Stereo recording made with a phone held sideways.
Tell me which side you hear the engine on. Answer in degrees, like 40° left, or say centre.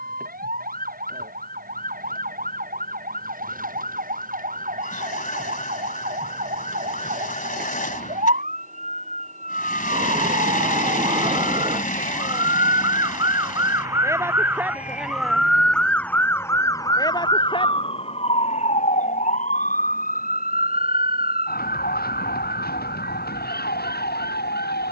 60° left.